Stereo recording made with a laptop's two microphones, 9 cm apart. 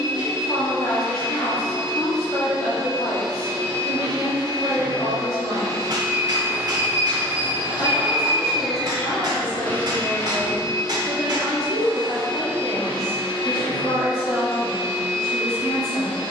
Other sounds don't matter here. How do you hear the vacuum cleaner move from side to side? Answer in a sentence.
In this clip you hear the vacuum cleaner move from right to left.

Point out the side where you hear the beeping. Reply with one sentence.
In this clip you hear the beeping on the right.